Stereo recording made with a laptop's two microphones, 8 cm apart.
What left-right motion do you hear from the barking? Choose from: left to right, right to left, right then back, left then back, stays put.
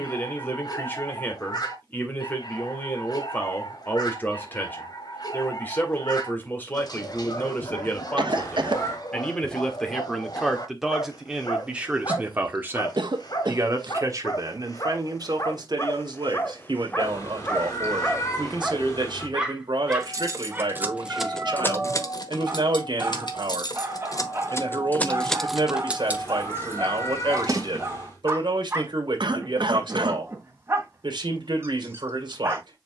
left to right.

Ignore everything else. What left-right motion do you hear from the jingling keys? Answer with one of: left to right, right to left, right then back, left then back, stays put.
left then back.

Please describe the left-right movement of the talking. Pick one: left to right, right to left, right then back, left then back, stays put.
left to right.